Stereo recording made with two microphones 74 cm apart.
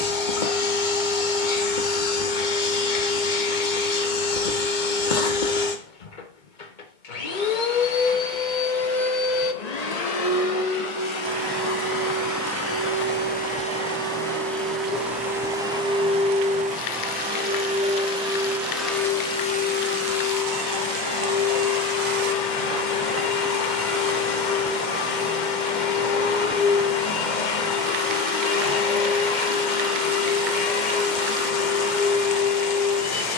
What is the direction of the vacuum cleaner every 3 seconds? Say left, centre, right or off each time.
left, left, left, left, centre, centre, centre, left, left, left, left.